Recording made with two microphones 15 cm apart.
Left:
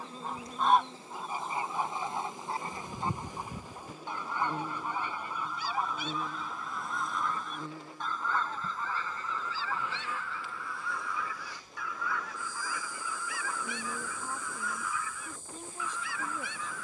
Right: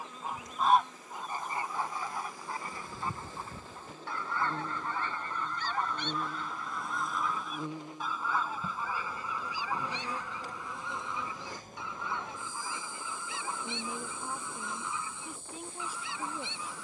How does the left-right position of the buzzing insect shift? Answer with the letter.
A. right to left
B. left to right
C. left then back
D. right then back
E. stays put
B.